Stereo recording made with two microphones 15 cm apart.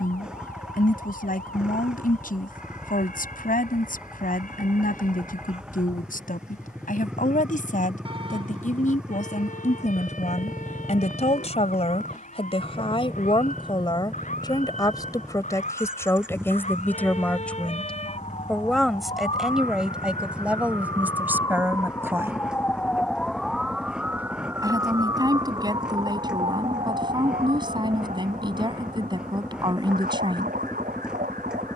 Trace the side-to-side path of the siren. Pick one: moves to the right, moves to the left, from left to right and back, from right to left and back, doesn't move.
moves to the right.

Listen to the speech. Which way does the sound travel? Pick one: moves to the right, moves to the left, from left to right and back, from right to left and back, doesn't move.
moves to the right.